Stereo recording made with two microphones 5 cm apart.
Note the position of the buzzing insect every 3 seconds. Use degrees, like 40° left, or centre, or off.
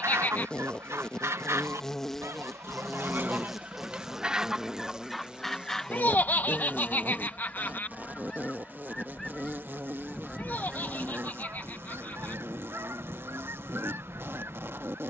10° left, 10° right, 30° right, 50° right, 50° right.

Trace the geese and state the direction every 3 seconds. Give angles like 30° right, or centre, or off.
60° right, 10° right, 20° left, 10° right, 50° right.